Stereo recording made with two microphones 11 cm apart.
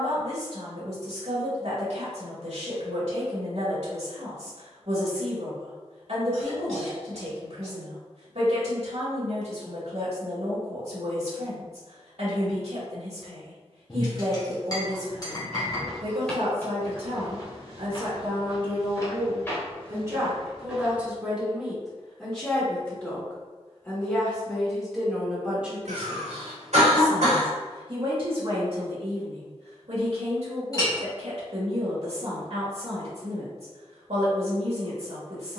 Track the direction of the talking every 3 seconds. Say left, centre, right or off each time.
right, right, right, right, right, right, right, centre, centre, right, right, right.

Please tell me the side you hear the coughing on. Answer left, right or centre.
right.